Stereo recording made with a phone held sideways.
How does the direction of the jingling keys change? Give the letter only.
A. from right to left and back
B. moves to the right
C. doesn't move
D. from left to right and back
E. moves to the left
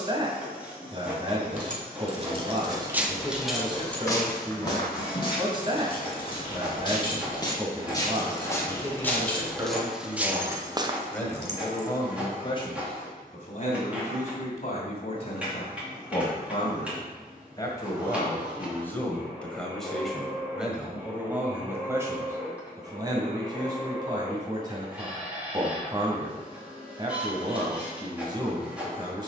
A.